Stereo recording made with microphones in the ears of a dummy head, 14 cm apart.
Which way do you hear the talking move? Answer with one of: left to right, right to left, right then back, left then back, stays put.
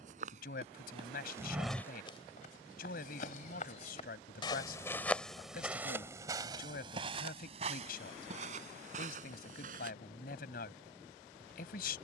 stays put.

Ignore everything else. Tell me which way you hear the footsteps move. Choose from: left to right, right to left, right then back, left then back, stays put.
left then back.